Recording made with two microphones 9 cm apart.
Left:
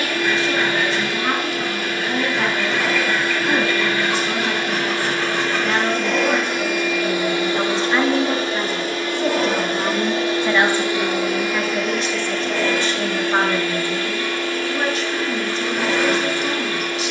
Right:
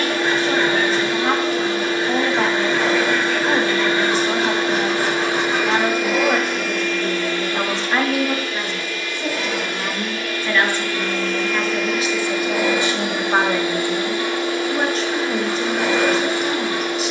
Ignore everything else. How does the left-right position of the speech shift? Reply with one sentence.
In this clip you hear the speech move from right to left and back again.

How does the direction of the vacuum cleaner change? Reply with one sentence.
In this clip you hear the vacuum cleaner go left and come back.